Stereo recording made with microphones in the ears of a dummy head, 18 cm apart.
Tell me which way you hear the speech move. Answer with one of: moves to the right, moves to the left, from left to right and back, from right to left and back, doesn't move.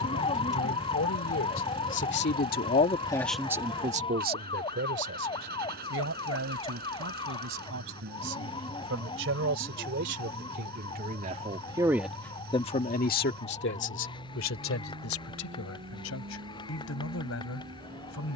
from left to right and back.